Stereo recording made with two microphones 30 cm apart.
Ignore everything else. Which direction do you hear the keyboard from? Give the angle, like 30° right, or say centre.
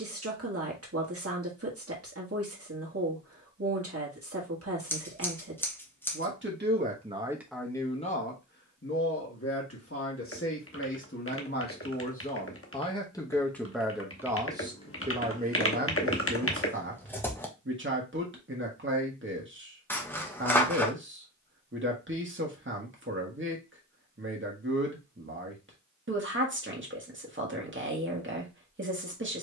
50° left.